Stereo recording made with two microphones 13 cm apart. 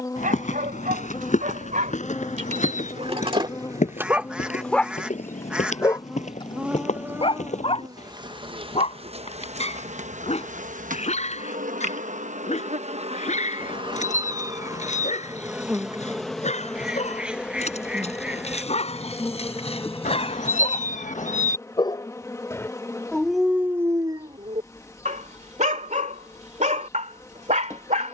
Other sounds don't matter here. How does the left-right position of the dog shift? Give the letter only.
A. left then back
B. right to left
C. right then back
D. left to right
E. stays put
A.